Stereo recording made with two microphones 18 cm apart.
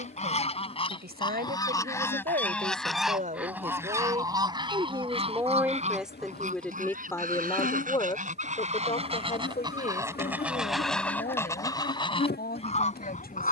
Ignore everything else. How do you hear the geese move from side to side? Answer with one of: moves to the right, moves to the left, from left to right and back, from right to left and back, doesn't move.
from left to right and back.